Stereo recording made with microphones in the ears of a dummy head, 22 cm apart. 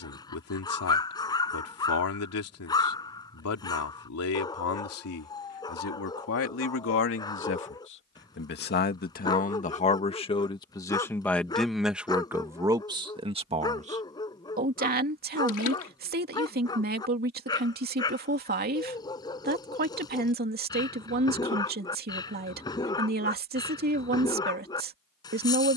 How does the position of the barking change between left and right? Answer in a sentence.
You can hear the barking stay put.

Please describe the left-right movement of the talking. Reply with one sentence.
In this clip you hear the talking move from left to right.